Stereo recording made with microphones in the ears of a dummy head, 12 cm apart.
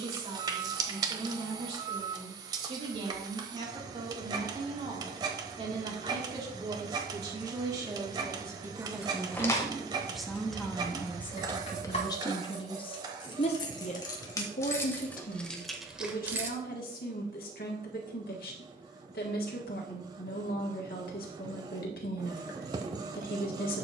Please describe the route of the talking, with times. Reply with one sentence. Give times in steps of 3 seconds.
In this clip you hear the talking on the right from 0 s, in the centre from 9 s and on the left from 12 s.